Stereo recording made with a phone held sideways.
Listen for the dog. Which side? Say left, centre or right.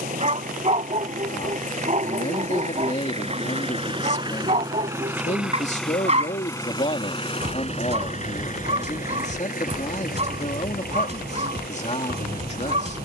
right.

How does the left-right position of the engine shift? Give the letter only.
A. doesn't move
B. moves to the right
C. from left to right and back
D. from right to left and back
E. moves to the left
E.